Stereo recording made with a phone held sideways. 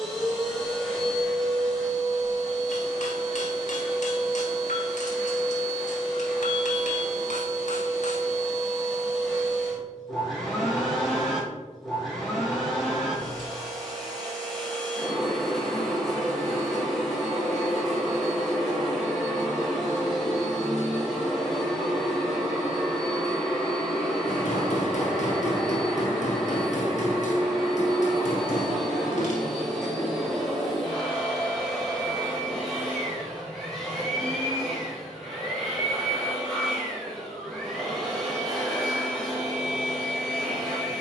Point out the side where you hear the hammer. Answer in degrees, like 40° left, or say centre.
60° left.